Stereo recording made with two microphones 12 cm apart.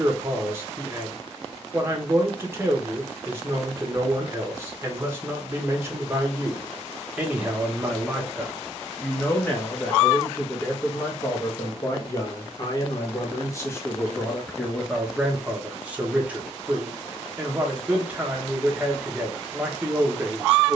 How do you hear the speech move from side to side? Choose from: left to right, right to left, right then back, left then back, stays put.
left then back.